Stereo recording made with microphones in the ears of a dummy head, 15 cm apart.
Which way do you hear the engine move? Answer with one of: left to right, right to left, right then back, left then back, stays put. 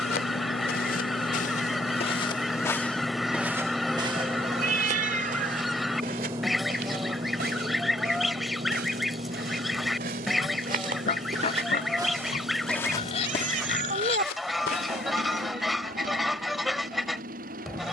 left to right.